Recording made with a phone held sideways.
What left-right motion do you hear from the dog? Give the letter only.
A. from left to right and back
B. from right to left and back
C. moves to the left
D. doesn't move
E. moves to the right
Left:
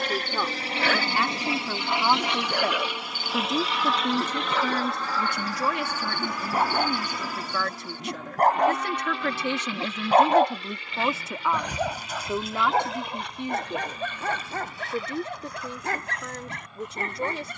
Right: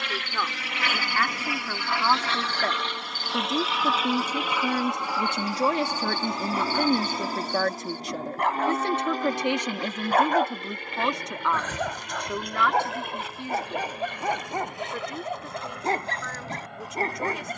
E.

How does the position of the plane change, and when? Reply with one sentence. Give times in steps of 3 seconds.
You can hear the plane on the left from 0 s, in the centre from 3 s and on the right from 6 s.